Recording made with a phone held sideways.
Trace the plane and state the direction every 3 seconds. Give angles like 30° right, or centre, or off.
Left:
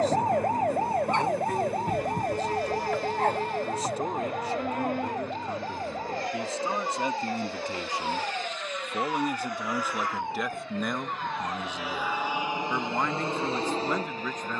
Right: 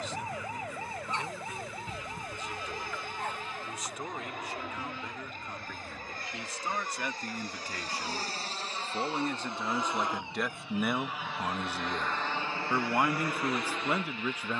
60° right, 60° right, 40° right, 10° right, 20° left.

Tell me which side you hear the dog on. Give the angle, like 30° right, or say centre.
60° left.